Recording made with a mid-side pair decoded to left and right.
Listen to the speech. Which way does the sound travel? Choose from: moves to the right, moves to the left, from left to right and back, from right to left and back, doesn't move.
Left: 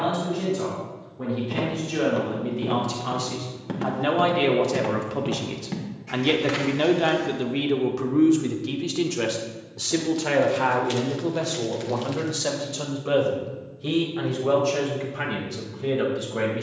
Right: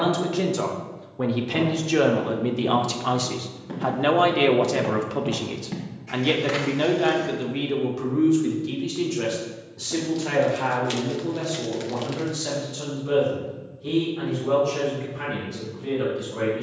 moves to the left.